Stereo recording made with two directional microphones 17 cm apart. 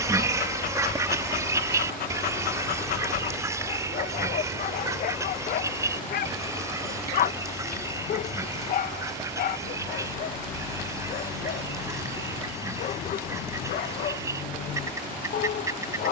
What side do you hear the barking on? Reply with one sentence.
You can hear the barking on the left.